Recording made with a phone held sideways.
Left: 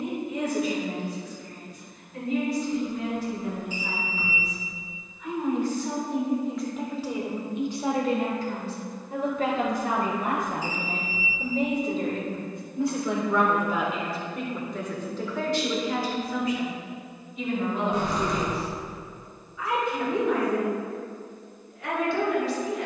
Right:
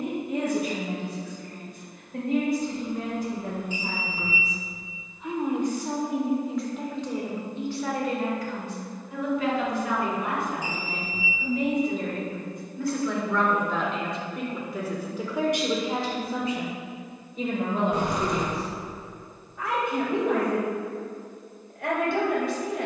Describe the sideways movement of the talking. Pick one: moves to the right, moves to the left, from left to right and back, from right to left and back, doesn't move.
from right to left and back.